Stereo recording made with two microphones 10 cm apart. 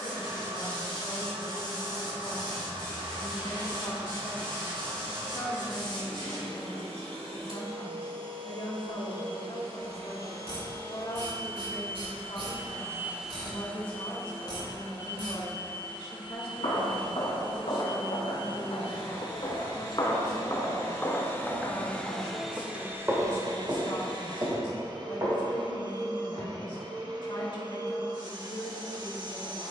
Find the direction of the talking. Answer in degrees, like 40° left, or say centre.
50° left.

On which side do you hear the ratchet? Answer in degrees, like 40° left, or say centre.
70° right.